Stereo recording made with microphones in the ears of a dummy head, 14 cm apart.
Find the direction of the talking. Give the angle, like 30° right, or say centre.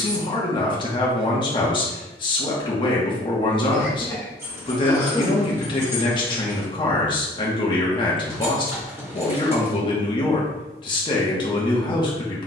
30° left.